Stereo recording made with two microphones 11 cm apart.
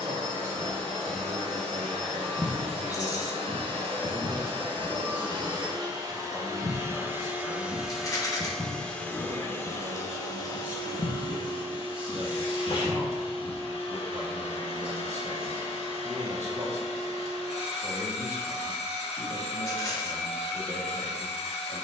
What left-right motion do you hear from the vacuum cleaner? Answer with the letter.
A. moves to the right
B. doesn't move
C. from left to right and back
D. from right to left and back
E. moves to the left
E.